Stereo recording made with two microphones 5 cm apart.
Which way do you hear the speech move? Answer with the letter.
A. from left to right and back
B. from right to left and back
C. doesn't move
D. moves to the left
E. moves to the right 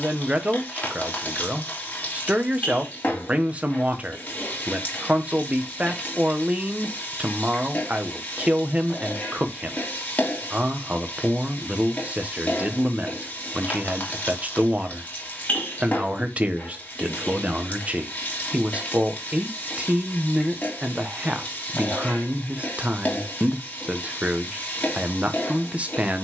C.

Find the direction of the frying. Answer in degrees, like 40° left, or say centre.
40° left.